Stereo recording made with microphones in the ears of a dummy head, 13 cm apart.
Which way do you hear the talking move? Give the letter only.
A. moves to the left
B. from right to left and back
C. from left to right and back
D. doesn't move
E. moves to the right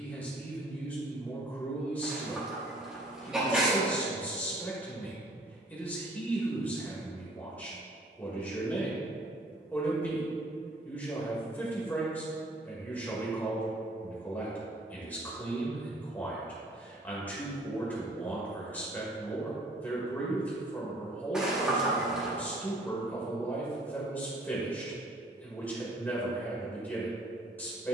D.